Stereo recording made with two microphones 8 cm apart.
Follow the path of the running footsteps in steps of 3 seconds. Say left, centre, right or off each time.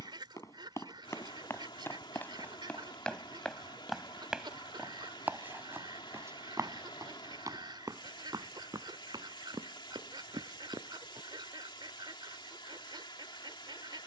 left, centre, right, right, off.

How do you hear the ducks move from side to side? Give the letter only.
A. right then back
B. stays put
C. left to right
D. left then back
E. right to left
B.